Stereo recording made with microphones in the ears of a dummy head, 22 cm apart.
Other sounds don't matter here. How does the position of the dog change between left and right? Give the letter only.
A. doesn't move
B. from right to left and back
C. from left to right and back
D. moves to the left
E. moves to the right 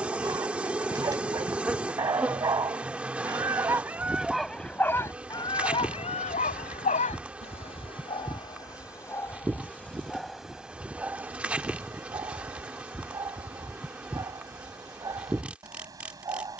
B.